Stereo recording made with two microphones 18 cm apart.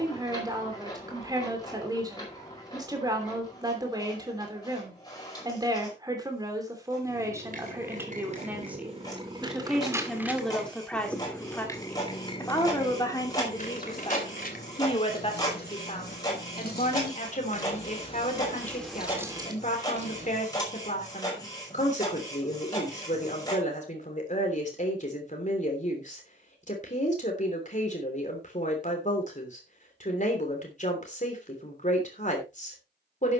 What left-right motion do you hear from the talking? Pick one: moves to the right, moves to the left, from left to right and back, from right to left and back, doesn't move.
moves to the left.